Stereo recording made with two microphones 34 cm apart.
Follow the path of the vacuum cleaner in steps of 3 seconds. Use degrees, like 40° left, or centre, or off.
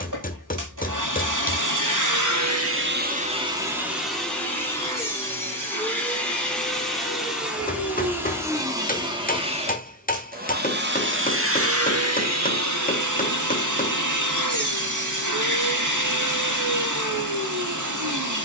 60° right, centre, centre, 30° right, 60° right, 60° right.